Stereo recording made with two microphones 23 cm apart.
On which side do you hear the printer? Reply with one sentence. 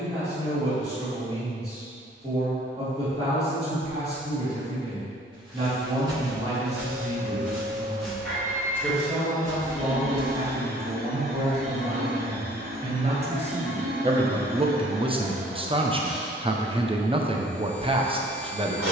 You can hear the printer on the right.